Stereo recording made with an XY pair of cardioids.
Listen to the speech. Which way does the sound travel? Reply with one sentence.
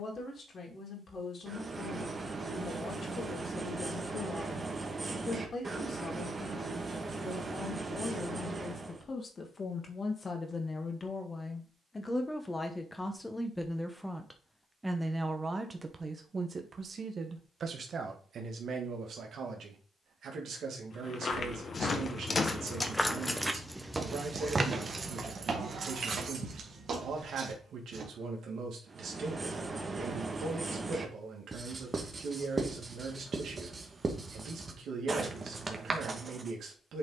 You can hear the speech move from left to right.